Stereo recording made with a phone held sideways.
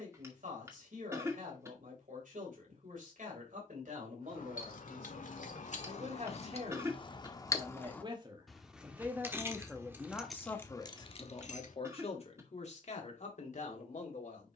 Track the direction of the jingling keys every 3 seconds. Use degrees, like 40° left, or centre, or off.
off, 70° left, 30° left, 10° left, off.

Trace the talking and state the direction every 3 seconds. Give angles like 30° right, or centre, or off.
70° right, 60° right, 40° right, 20° left, 60° left.